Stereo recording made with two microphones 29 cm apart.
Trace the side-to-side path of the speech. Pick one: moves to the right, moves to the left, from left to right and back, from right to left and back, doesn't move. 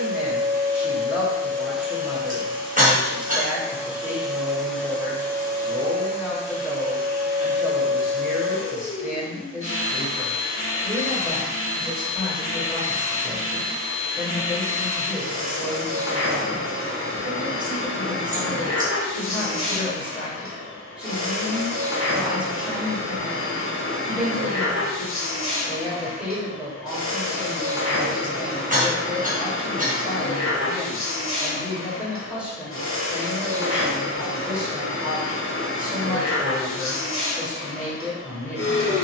doesn't move.